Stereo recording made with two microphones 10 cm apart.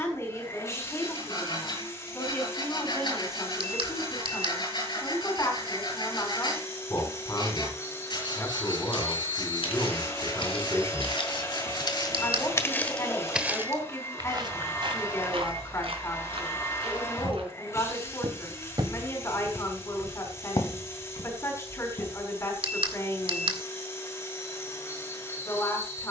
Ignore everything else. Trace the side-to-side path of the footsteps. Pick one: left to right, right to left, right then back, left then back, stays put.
right then back.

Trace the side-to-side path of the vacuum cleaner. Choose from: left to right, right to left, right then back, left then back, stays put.
stays put.